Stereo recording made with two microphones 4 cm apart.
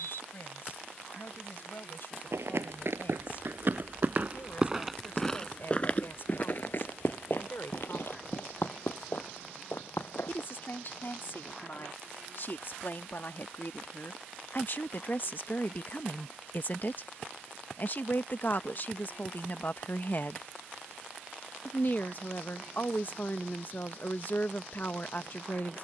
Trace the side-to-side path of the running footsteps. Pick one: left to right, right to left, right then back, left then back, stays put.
right to left.